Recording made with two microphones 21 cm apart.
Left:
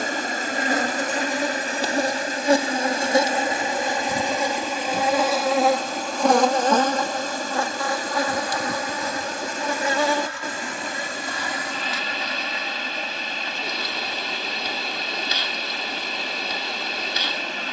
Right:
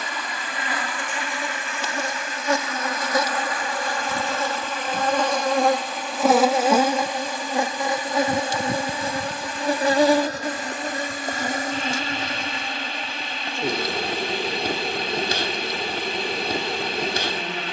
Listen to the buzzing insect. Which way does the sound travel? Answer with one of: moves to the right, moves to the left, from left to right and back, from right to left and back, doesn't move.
moves to the right.